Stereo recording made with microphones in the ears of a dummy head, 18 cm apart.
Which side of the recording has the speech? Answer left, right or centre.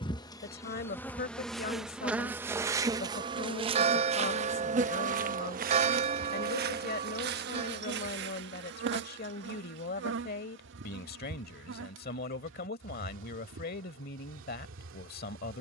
left.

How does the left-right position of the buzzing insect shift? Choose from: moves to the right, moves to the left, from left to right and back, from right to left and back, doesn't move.
moves to the right.